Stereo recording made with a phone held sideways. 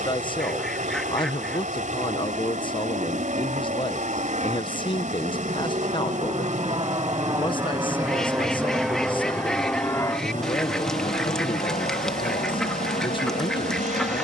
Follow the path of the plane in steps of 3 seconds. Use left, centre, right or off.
right, right, right, left, left.